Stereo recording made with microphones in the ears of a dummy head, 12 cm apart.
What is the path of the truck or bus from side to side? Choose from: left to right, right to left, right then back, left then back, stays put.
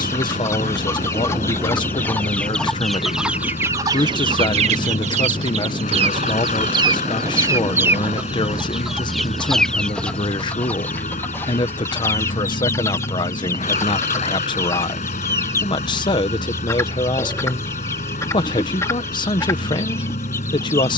stays put.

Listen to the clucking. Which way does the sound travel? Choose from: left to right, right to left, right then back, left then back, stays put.
right then back.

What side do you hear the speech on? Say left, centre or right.
left.